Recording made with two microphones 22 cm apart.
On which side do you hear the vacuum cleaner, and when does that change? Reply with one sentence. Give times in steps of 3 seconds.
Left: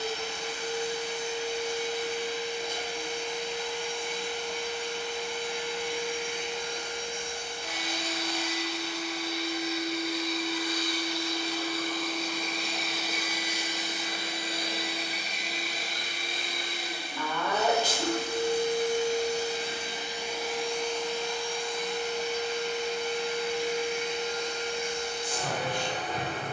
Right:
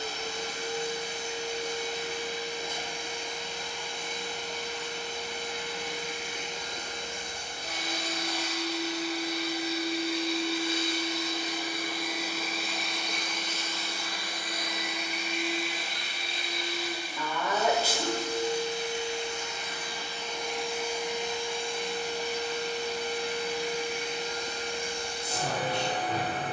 In this clip you hear the vacuum cleaner on the right from 0 s, in the centre from 12 s, on the left from 15 s and on the right from 21 s.